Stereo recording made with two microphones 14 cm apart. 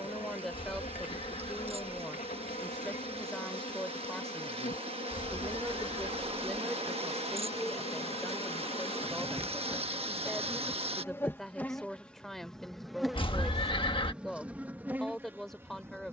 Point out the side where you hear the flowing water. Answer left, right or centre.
right.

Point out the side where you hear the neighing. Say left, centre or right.
left.